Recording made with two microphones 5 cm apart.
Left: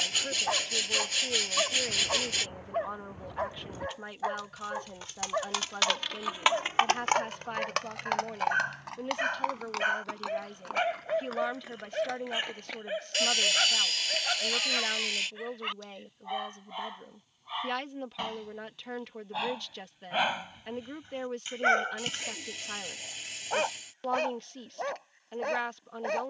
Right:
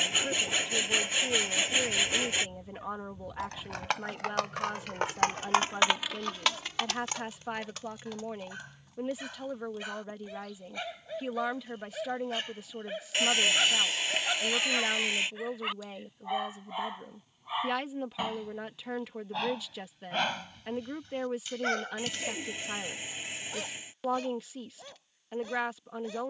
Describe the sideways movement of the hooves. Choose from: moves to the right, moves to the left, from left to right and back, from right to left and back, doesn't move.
moves to the left.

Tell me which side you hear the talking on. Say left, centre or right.
centre.